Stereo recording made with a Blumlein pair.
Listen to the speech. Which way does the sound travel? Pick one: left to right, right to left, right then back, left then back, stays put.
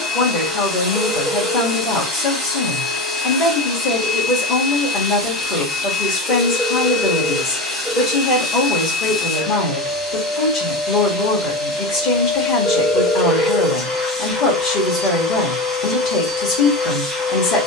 stays put.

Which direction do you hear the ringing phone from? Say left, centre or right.
centre.